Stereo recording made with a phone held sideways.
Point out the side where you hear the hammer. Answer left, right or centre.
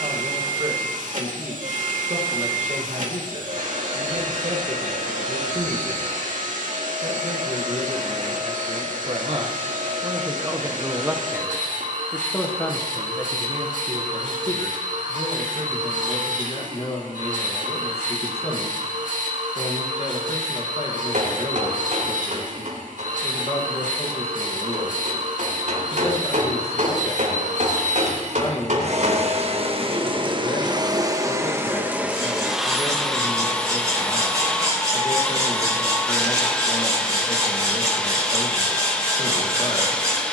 right.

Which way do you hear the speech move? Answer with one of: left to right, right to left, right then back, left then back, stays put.
right to left.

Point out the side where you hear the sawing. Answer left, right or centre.
right.